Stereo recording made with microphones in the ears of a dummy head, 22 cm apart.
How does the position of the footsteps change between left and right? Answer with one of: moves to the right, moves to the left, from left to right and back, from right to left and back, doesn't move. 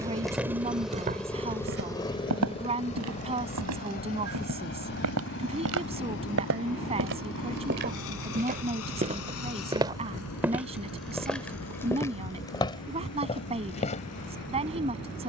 from left to right and back.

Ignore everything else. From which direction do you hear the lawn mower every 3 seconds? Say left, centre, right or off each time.
centre, left, left, left, left.